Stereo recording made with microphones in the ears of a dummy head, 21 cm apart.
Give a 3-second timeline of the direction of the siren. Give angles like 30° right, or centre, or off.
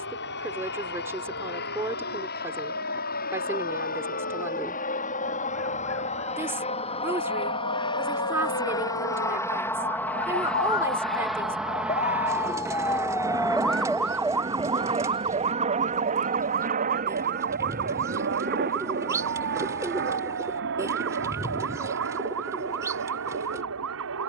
80° left, 70° left, 70° left, 50° left, 10° left, 40° right, 60° right, 70° right.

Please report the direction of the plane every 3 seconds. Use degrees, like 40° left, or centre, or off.
50° left, 40° left, 20° left, centre, 20° right, 30° right, 40° right, 50° right.